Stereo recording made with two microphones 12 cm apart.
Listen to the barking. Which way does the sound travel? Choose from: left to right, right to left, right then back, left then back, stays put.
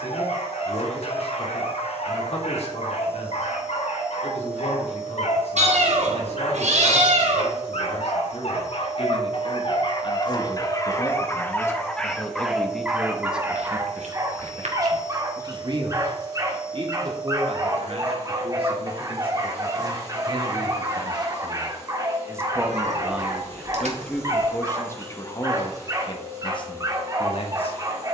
left to right.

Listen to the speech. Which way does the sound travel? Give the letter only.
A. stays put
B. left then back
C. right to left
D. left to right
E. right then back
E.